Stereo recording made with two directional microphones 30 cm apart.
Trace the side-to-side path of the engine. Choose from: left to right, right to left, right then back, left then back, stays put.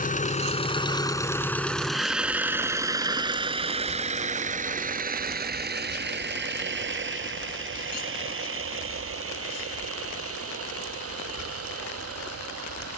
left to right.